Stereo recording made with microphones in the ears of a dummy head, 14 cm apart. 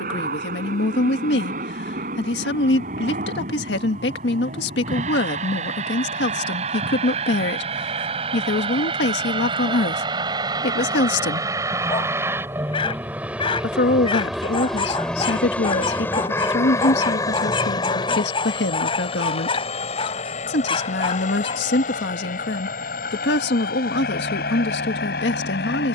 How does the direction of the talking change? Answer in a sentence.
In this clip you hear the talking stay in one place.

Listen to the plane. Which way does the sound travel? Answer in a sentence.
In this clip you hear the plane move from right to left.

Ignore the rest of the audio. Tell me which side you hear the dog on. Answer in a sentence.
In this clip you hear the dog on the left.